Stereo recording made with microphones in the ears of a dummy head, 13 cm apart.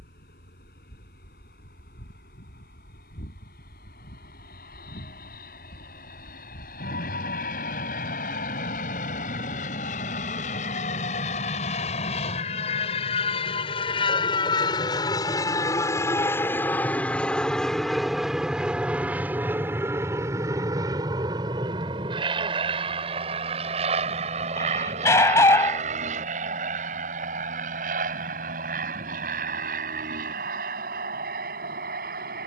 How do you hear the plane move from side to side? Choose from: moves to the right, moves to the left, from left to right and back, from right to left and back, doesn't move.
moves to the right.